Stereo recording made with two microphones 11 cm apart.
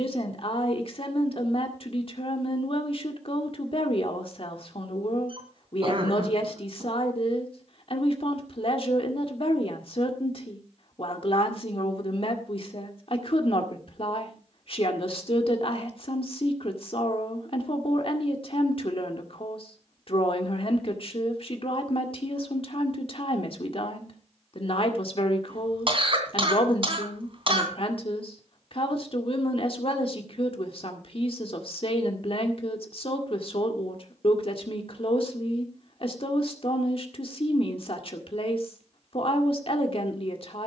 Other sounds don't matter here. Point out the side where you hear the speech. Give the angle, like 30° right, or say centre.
50° left.